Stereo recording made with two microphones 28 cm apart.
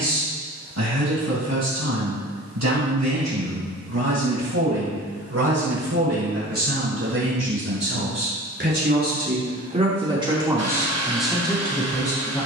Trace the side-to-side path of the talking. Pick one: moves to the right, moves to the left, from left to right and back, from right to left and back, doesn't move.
moves to the left.